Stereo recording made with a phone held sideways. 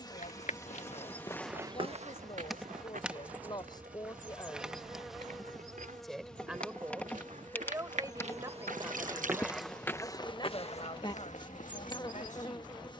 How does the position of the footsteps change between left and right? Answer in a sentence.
In this clip you hear the footsteps go right and come back.